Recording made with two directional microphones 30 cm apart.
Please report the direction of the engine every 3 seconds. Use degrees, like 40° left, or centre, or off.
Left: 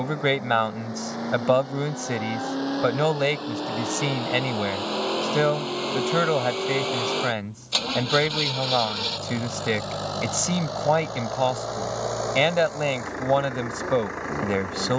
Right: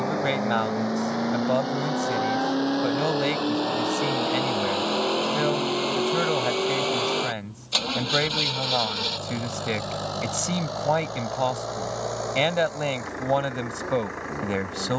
50° right, 30° right, centre, 30° left, 50° left.